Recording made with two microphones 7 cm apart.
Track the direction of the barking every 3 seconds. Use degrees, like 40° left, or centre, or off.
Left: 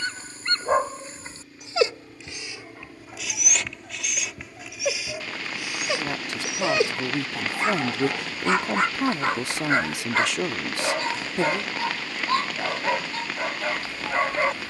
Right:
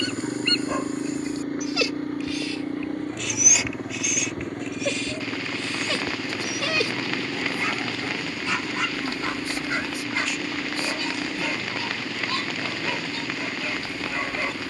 30° left, 10° left, 30° left, 40° left, 40° left.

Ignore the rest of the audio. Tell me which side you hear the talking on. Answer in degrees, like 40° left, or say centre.
70° left.